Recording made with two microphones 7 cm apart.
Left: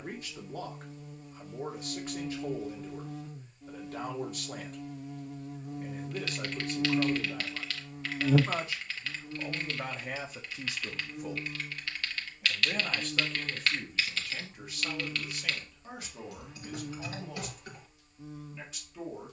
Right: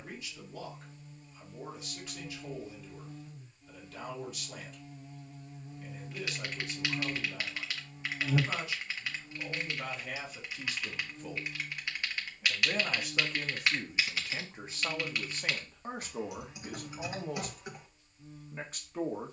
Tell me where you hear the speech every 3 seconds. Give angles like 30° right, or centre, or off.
40° left, 40° left, 40° left, 20° left, 20° right, 40° right, 50° right.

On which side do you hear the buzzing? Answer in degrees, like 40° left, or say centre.
80° left.